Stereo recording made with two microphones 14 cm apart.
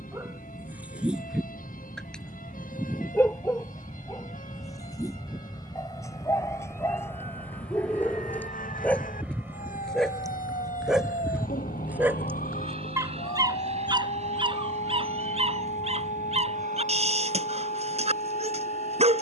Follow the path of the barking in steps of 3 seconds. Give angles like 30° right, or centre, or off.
centre, 20° left, 20° left, centre, 30° right, 50° right, 50° right.